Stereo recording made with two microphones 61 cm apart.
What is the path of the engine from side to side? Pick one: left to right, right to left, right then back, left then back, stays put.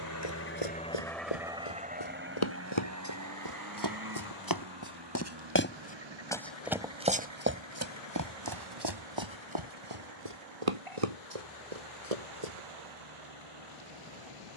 left to right.